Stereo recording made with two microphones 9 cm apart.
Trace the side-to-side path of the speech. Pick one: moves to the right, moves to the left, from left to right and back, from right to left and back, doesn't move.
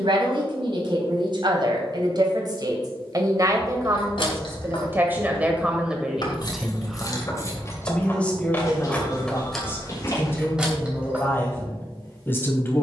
moves to the left.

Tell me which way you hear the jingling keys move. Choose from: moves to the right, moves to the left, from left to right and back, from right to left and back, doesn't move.
moves to the right.